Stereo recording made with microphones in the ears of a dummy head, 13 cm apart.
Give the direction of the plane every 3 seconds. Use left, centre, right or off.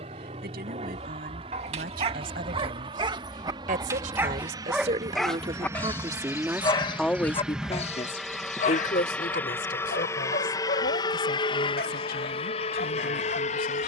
right, right, centre, left, left.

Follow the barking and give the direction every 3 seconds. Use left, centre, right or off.
right, centre, left, left, left.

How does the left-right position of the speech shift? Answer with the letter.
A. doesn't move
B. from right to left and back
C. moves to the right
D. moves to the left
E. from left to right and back
D.